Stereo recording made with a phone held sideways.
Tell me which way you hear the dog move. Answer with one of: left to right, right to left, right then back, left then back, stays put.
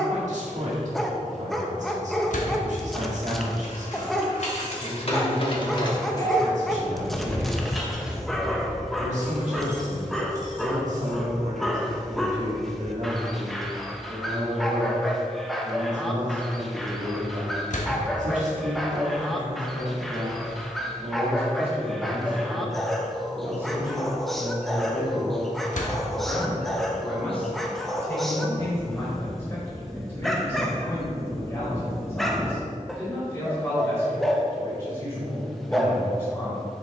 stays put.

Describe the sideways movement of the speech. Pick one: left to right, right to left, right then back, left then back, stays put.
right to left.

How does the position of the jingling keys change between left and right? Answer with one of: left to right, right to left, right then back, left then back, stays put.
left to right.